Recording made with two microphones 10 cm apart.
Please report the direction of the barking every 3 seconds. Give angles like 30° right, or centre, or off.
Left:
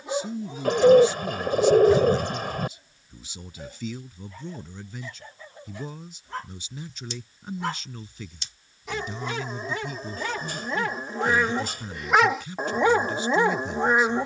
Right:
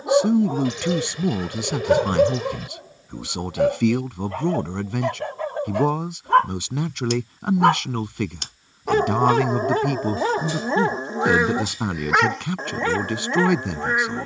60° right, 70° right, 60° right, 30° right, 10° left.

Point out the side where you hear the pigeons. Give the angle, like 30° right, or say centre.
50° left.